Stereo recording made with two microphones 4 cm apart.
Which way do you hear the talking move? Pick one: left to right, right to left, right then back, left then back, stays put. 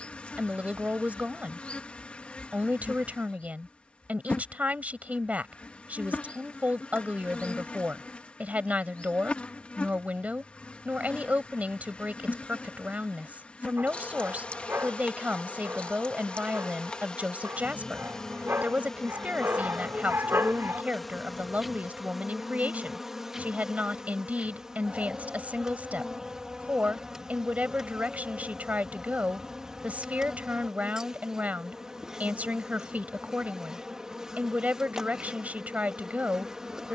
stays put.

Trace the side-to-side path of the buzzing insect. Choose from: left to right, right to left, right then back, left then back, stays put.
left to right.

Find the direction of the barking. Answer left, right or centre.
right.